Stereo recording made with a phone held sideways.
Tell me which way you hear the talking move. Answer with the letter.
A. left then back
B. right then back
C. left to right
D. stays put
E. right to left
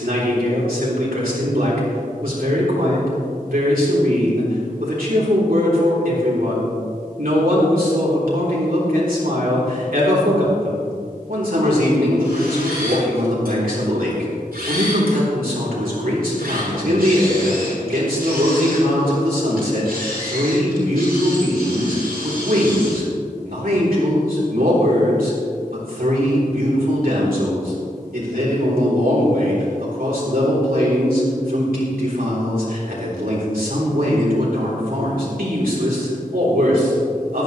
D.